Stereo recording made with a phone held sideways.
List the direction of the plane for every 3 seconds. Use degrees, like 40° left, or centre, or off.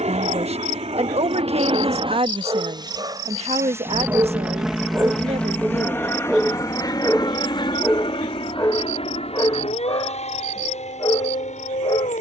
50° right, 10° right, 30° left, 50° left.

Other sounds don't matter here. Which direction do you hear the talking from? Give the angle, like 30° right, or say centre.
50° right.